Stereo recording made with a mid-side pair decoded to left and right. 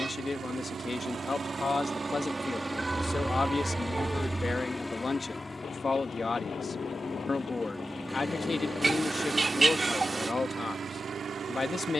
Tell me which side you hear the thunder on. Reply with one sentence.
You can hear the thunder on the left.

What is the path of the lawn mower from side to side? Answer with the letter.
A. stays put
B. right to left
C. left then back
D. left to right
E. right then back
C.